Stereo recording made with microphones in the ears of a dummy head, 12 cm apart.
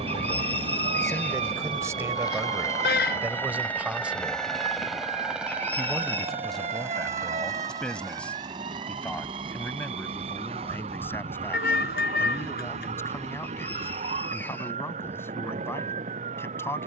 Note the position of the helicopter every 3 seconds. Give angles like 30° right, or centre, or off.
30° left, centre, 20° right, 40° right, 50° right, 50° right.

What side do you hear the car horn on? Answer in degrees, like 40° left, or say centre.
70° left.